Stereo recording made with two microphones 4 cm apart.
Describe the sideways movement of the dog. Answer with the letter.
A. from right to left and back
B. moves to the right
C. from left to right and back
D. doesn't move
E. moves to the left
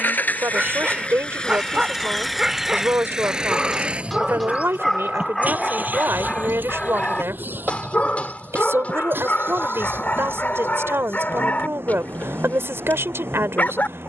E.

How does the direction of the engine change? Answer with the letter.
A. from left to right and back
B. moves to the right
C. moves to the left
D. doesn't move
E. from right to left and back
B.